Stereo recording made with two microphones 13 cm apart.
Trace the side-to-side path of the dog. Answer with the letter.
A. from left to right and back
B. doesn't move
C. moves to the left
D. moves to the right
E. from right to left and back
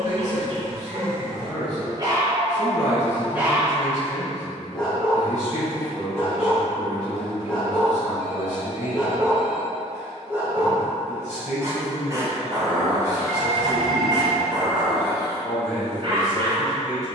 E.